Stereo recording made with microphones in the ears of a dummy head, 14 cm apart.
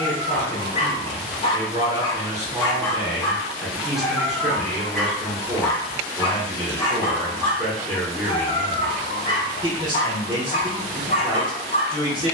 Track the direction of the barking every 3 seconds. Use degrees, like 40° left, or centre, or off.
30° left, centre, 40° left, 40° left.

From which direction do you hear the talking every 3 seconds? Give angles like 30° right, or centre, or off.
30° right, centre, 10° left, 30° right.